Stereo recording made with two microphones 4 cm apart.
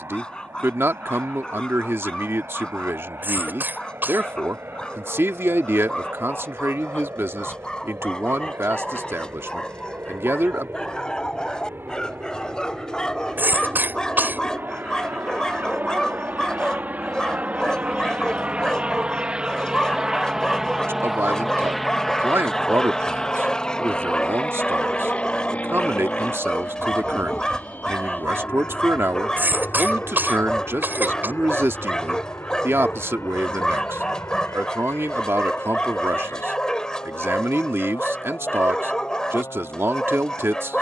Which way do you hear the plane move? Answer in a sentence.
In this clip you hear the plane go from the right side to the left.